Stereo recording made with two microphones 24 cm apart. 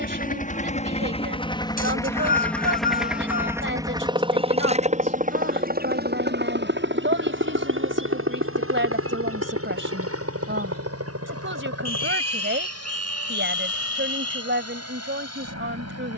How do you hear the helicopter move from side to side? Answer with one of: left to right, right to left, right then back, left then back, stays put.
left to right.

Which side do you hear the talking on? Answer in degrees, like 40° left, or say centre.
50° right.